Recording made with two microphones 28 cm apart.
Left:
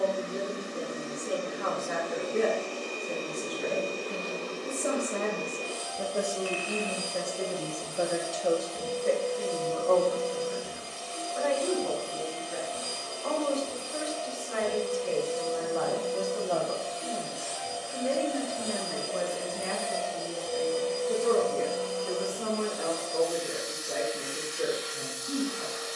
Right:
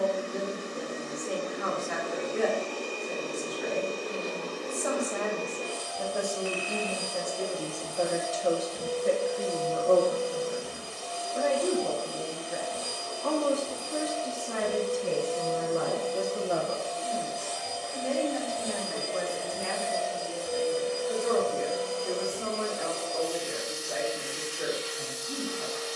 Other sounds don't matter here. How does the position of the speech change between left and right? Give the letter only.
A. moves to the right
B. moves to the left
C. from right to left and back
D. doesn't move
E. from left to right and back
E.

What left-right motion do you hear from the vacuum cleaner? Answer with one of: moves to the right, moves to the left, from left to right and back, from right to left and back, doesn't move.
moves to the right.